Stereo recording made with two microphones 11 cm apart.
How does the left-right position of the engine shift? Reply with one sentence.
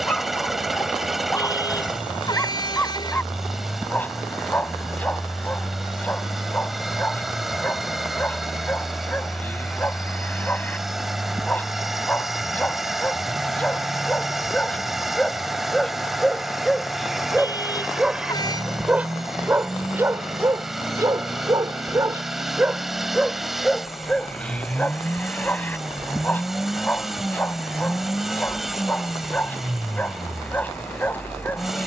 You can hear the engine stay in one place.